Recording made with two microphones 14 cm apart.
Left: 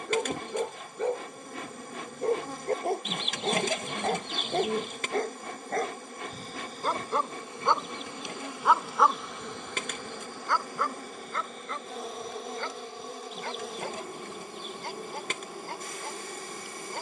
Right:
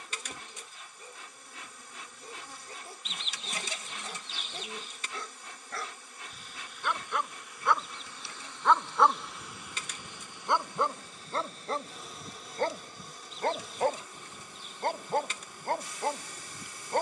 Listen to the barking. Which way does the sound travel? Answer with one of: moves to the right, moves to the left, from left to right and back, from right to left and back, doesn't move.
moves to the right.